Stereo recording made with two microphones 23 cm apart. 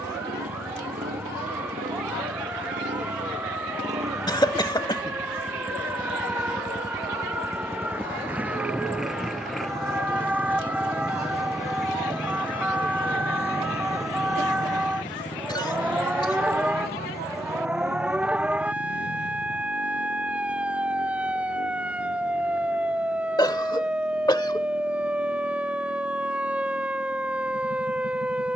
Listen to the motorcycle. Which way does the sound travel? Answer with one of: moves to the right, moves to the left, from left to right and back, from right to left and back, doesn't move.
moves to the left.